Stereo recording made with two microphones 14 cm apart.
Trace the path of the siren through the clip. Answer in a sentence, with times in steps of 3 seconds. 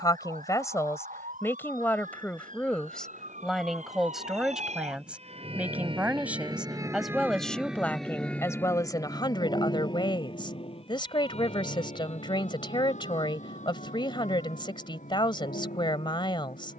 In this clip you hear the siren on the right from 0 s, in the centre from 6 s and on the left from 9 s.